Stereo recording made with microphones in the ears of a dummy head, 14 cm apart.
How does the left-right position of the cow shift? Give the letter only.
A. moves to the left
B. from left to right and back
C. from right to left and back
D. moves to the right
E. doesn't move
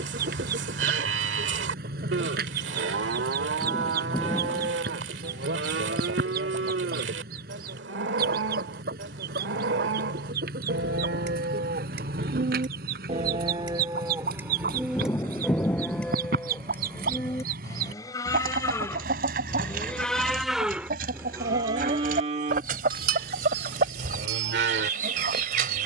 C.